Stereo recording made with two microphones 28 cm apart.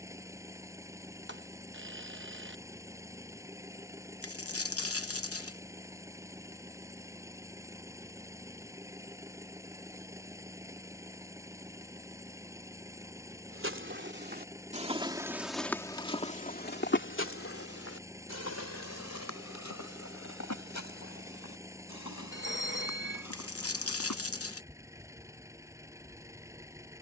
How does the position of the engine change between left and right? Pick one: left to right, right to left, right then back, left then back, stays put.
stays put.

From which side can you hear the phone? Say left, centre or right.
right.